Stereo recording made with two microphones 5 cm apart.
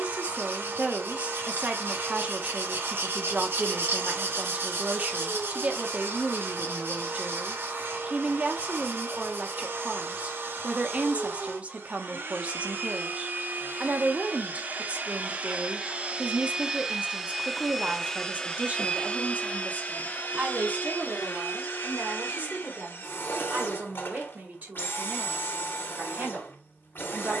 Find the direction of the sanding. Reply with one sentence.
You can hear the sanding on the right.